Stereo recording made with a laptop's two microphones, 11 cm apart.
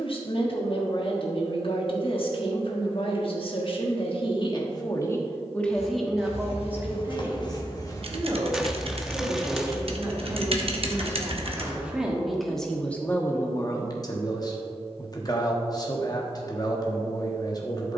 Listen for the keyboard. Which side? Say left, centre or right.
right.